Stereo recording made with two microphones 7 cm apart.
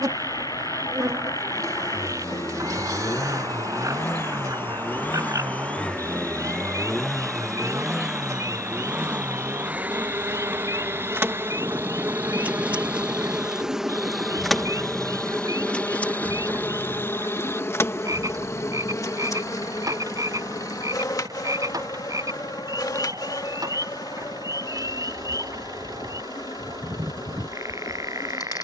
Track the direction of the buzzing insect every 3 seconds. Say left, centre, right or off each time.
right, right, right, right, centre, left, left, left, left, left.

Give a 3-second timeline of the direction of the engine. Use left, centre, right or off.
left, left, centre, right, right, right, right, right, right, right.